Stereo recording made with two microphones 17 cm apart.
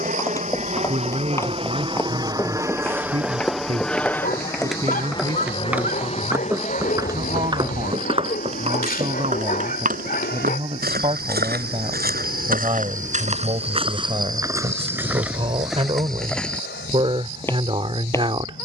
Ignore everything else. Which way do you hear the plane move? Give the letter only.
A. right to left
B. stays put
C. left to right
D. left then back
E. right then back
A.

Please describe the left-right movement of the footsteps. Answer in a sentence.
In this clip you hear the footsteps move from left to right and back again.